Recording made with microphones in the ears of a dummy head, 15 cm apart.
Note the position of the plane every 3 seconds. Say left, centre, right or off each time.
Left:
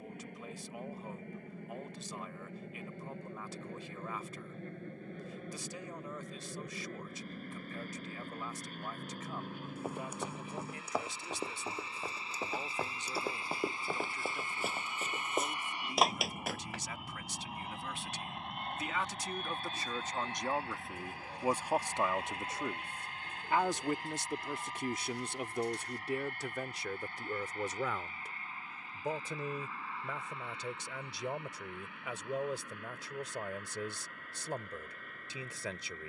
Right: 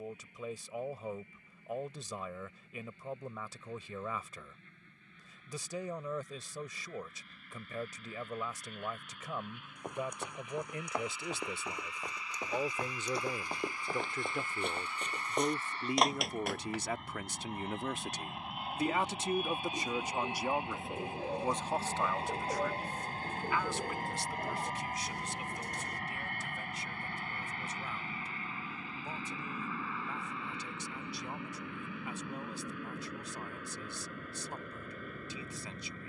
left, left, left, left, left, centre, centre, right, right, right, right, right.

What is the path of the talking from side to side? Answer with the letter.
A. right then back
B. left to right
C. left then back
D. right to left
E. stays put
D.